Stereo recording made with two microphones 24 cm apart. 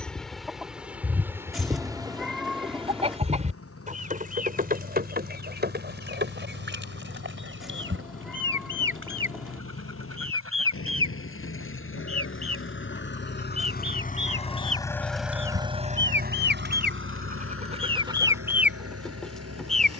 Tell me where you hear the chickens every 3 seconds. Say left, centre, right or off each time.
centre, right, right, right, right, right, centre.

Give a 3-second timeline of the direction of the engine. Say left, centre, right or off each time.
left, left, left, left, left, right, right.